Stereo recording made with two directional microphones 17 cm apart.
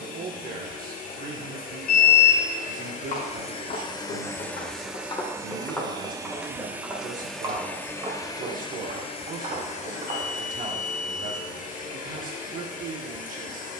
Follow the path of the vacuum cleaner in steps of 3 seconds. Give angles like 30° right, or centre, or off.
50° left, 10° left, 10° left, 50° left, 50° left.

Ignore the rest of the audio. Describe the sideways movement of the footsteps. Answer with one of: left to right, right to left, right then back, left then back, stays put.
left to right.